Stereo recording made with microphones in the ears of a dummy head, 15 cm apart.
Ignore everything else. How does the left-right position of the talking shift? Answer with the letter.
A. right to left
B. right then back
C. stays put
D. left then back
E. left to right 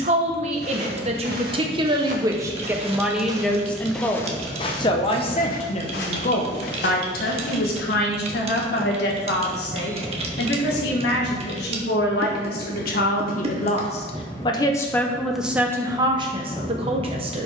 D.